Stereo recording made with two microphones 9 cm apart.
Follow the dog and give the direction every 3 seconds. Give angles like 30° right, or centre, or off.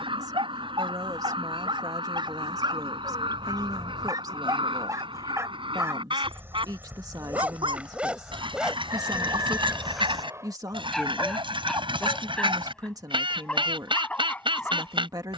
60° right, 40° right, 20° right, centre, 10° left.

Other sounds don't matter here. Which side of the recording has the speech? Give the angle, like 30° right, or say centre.
40° right.